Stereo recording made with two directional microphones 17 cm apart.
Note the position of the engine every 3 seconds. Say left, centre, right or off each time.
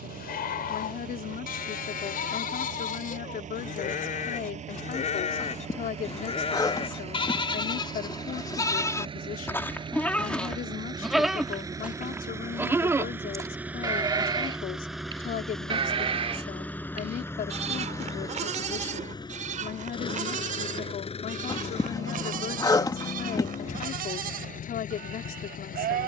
right, right, right, right, centre, centre, left, left, left.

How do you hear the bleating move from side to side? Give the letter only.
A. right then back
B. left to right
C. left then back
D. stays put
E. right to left
B.